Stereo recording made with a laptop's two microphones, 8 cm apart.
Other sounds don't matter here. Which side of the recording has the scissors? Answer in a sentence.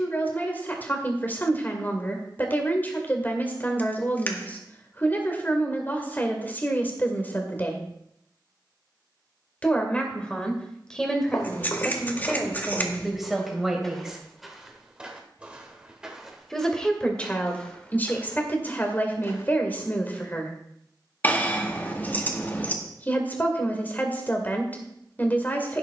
You can hear the scissors on the left.